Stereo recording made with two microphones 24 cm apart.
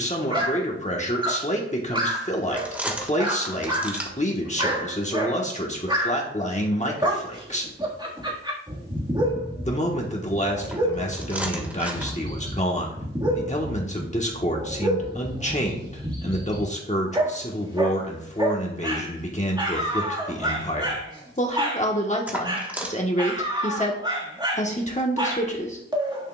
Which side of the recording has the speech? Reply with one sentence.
In this clip you hear the speech on the left.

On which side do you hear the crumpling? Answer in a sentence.
You can hear the crumpling in the centre.